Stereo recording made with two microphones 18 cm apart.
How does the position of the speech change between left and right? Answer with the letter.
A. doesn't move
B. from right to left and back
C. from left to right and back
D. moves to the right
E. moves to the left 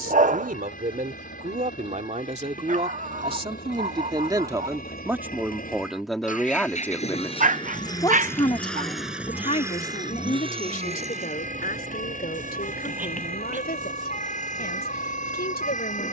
E.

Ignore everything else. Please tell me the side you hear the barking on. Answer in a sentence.
In this clip you hear the barking on the right.